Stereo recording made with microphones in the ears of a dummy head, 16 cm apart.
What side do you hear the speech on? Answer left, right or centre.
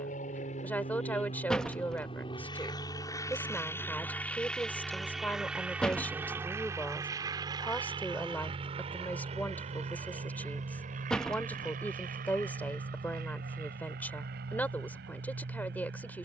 centre.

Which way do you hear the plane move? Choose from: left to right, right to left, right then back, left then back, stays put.
left to right.